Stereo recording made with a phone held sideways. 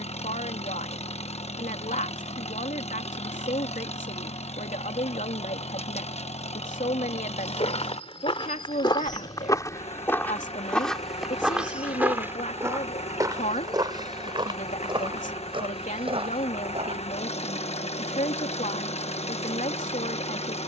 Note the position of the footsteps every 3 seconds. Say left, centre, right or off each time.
off, off, left, centre, right, right, off.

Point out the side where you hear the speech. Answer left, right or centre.
left.